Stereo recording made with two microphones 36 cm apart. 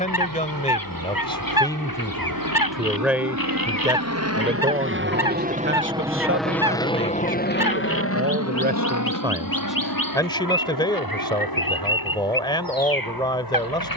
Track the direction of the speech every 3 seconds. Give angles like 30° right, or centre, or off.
10° left, 20° right, 40° right, 10° left, 10° left.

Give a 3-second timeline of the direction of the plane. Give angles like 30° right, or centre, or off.
70° right, 40° right, 20° left, 60° left, 70° left.